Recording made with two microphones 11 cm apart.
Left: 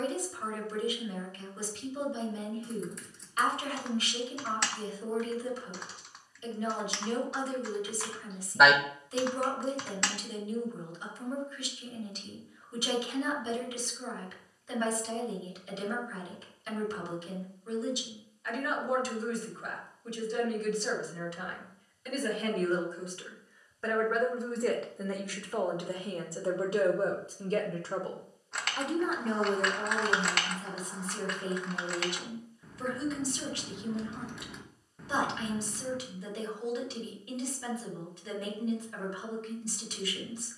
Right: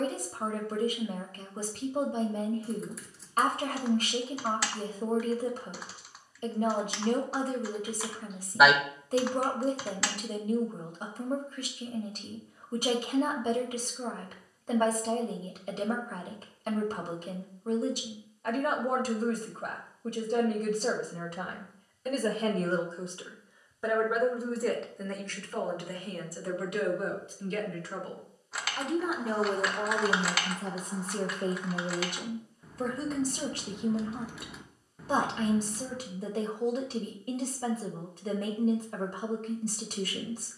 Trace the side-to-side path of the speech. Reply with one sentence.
You can hear the speech go left and come back.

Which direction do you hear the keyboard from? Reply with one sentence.
You can hear the keyboard in the centre.